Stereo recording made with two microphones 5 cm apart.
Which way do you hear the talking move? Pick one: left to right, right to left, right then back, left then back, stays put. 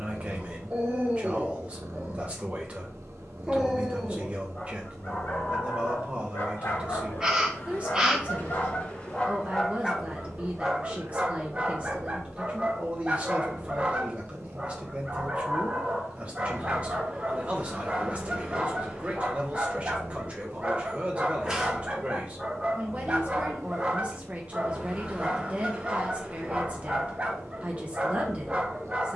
stays put.